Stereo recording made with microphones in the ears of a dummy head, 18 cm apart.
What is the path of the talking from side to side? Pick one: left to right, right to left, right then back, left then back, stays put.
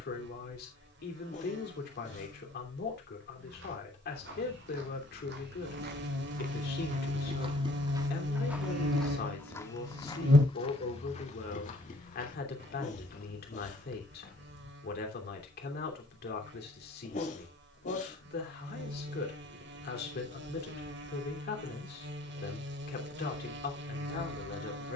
stays put.